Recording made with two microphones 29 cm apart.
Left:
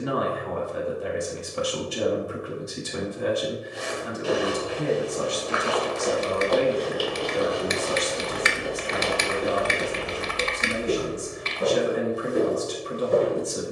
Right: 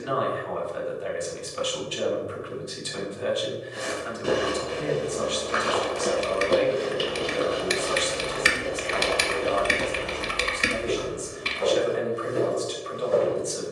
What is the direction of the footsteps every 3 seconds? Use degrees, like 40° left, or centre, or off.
off, 50° right, 20° right, 20° left, 40° left.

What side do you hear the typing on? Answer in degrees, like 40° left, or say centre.
40° right.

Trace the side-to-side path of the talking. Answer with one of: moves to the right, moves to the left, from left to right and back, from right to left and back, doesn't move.
doesn't move.